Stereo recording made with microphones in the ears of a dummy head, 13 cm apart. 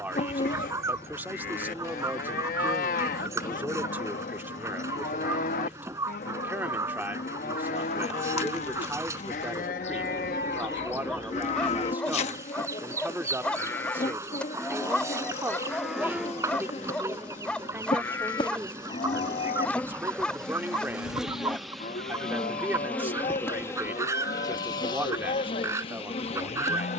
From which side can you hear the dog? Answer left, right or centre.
centre.